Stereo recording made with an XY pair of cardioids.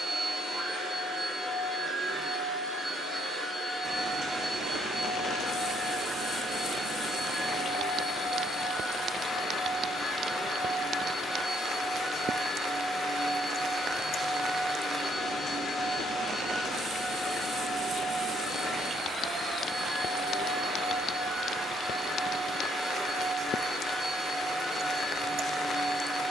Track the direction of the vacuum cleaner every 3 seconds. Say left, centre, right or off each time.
right, centre, centre, centre, centre, centre, centre, centre, centre.